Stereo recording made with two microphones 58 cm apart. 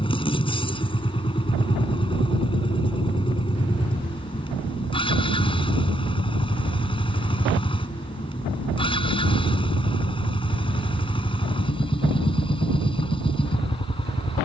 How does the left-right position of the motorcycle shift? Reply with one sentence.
In this clip you hear the motorcycle stay in one place.